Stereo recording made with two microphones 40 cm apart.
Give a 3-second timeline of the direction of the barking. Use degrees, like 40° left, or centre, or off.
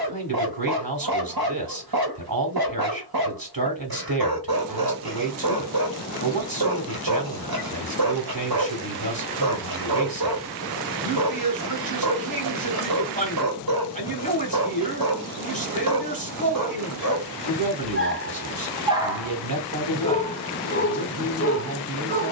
60° right, 60° right, 60° right, 60° right, 60° right, 50° right, centre, 30° left.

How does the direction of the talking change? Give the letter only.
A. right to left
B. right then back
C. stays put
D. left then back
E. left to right
C.